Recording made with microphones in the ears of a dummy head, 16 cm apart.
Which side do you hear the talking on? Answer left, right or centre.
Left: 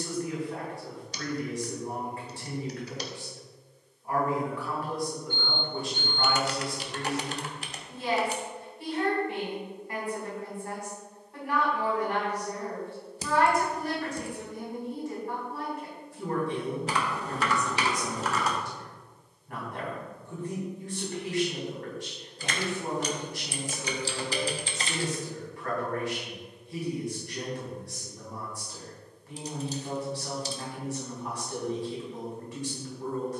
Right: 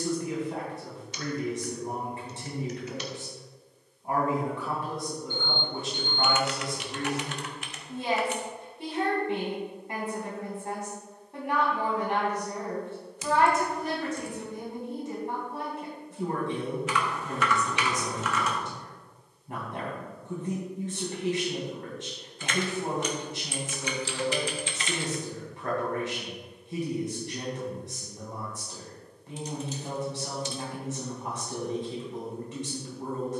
right.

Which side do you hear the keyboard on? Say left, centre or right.
left.